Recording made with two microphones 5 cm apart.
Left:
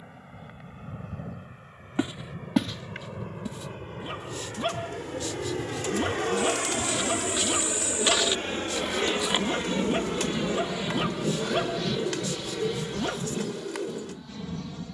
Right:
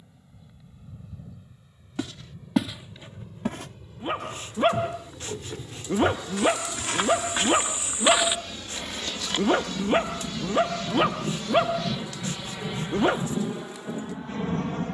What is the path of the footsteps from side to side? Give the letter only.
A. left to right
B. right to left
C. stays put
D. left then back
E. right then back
E.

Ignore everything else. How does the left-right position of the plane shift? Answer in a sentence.
In this clip you hear the plane go from the left side to the right.